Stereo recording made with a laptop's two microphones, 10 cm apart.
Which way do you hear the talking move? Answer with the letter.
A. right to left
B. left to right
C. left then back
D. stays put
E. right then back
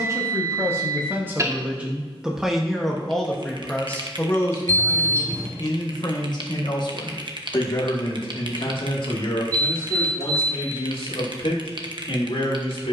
A.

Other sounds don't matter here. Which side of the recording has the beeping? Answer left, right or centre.
right.